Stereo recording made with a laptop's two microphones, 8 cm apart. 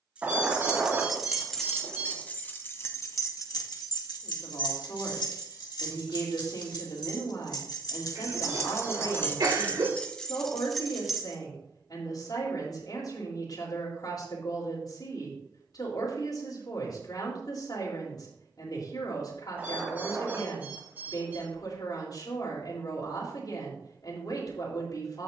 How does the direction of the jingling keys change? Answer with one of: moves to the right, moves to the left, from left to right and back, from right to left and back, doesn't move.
from right to left and back.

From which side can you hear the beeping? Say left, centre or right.
right.